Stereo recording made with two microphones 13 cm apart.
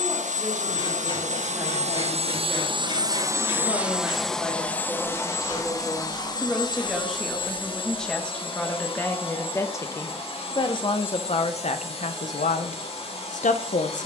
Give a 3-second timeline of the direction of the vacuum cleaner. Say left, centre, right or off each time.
right, centre, left, left, left.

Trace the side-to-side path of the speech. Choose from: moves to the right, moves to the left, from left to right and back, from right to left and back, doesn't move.
moves to the left.